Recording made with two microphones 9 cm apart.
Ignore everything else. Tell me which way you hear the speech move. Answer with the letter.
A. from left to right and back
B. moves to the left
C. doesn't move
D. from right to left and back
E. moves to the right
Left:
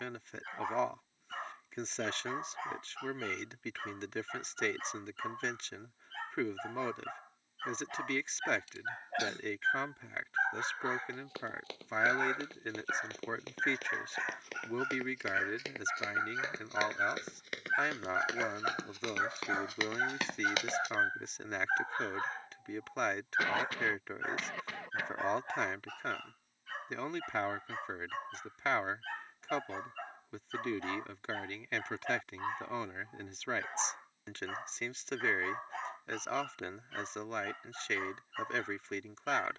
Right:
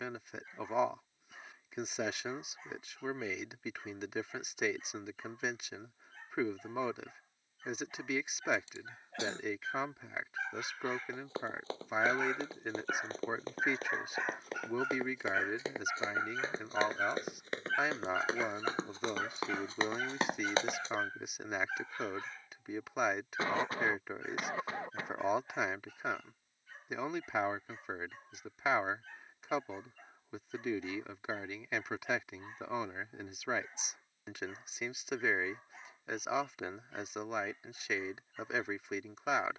C.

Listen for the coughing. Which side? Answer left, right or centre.
right.